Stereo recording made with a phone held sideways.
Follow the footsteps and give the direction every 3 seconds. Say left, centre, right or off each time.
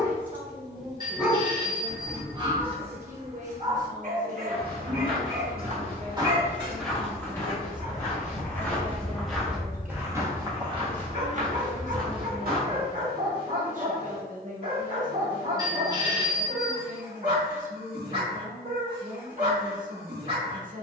off, right, centre, right, right, off, off.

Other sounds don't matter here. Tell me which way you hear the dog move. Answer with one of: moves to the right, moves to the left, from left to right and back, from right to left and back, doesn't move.
moves to the right.